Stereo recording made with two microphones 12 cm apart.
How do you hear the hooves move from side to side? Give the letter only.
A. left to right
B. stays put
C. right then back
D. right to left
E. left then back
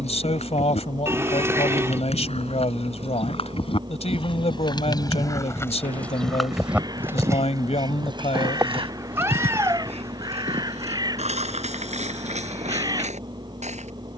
A.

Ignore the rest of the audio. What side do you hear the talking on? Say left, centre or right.
left.